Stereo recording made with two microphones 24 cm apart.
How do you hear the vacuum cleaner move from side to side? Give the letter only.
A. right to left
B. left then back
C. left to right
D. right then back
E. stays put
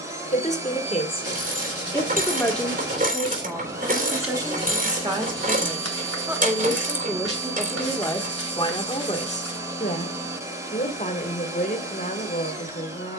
E.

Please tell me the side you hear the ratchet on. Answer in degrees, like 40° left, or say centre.
30° right.